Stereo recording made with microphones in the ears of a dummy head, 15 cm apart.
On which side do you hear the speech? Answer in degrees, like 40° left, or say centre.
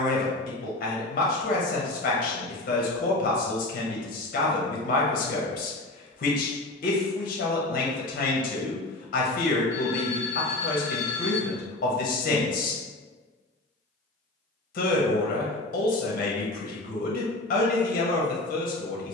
50° left.